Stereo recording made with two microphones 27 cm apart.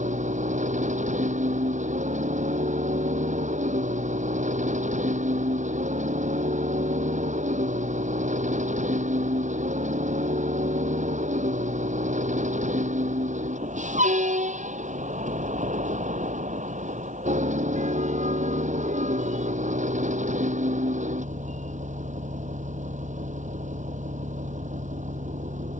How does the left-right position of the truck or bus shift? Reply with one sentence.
In this clip you hear the truck or bus stay in one place.